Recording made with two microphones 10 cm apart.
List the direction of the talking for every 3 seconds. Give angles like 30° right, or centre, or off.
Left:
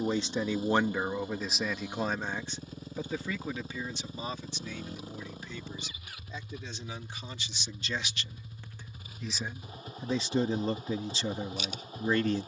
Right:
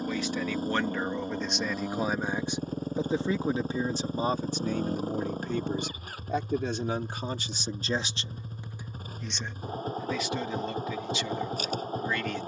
10° left, 40° right, 40° right, 30° left.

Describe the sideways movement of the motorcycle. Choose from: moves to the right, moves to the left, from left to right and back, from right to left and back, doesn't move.
doesn't move.